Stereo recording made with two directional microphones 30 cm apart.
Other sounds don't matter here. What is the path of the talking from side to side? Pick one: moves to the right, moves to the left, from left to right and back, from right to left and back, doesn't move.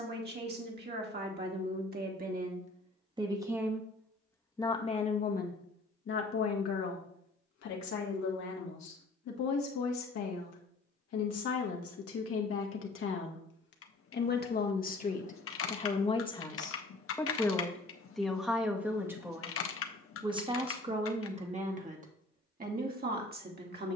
from right to left and back.